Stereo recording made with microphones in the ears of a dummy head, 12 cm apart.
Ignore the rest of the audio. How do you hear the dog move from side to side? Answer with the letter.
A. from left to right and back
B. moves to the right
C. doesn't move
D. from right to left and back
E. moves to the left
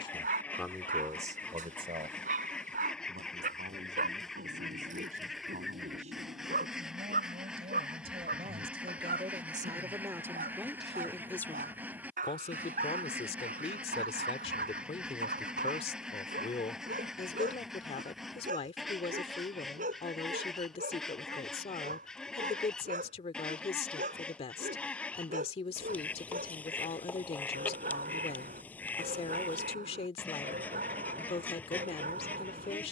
C.